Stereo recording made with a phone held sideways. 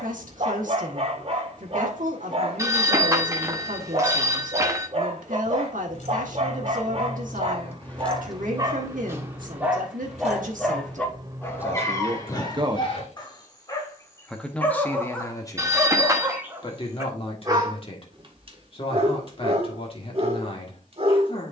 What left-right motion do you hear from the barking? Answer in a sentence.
You can hear the barking move from right to left and back again.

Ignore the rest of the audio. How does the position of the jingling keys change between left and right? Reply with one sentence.
You can hear the jingling keys go right and come back.